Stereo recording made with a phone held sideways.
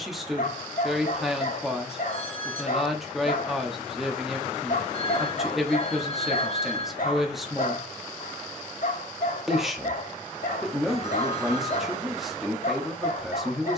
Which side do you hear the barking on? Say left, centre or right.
left.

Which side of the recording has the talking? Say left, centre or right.
centre.